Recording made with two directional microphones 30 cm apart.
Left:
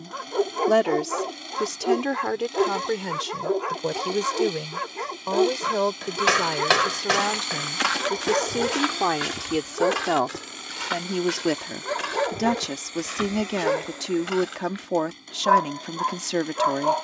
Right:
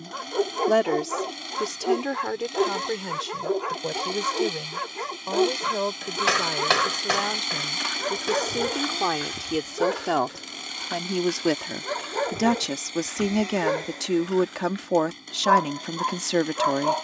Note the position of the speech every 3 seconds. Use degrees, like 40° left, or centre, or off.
10° left, 30° left, 20° left, centre, 10° right, 10° right.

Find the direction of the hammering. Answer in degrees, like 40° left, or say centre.
20° left.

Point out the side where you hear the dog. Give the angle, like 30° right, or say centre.
10° left.